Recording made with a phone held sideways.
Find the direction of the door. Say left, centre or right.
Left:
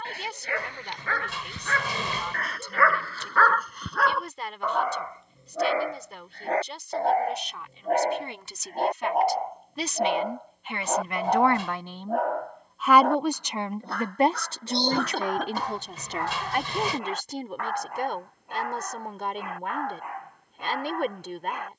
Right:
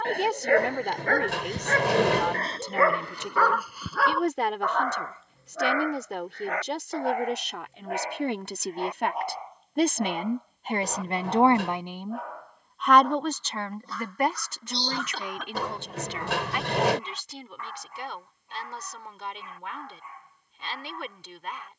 right.